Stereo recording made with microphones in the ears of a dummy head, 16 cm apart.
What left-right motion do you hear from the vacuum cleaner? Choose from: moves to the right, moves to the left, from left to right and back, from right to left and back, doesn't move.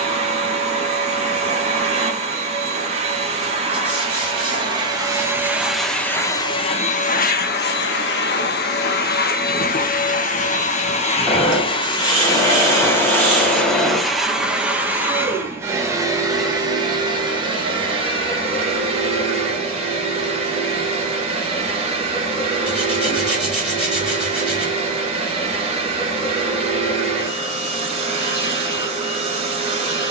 from right to left and back.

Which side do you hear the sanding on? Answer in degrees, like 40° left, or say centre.
centre.